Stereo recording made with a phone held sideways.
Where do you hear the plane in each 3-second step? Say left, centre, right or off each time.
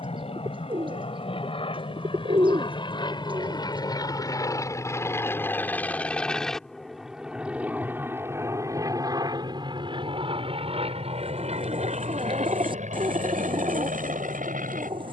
left, left, centre, right, right.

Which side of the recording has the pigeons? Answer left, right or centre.
right.